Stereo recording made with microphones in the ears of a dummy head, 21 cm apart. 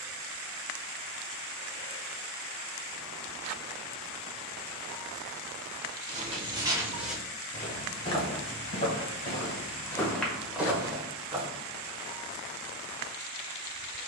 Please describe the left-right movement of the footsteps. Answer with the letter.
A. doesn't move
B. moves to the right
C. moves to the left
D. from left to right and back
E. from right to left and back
E.